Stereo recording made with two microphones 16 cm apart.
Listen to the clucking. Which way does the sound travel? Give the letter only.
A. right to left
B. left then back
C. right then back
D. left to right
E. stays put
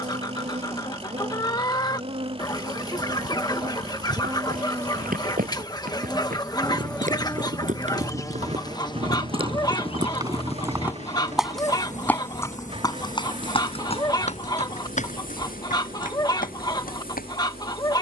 E.